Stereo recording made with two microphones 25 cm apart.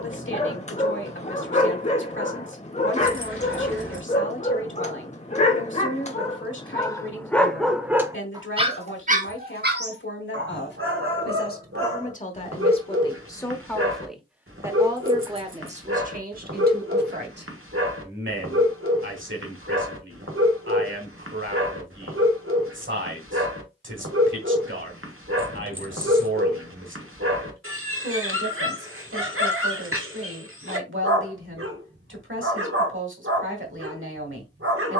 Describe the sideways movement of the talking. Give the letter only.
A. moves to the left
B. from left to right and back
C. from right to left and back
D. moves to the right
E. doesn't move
D.